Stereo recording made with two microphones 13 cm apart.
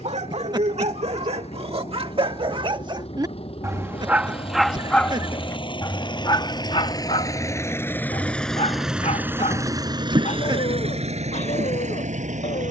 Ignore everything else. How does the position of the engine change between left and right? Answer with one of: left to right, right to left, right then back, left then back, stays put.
left to right.